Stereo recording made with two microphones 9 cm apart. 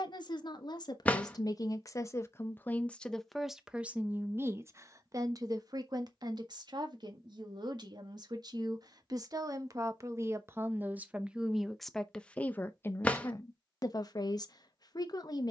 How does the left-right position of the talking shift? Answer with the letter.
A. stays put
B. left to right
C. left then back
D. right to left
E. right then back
E.